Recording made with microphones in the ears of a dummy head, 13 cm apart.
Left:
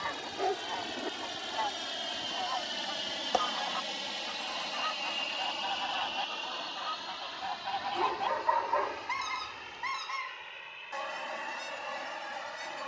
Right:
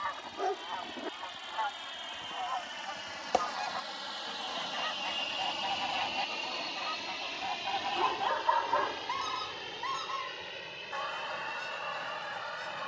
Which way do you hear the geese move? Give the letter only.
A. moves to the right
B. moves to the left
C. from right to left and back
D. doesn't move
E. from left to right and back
E.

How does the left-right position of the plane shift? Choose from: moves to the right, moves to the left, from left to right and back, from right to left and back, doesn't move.
moves to the right.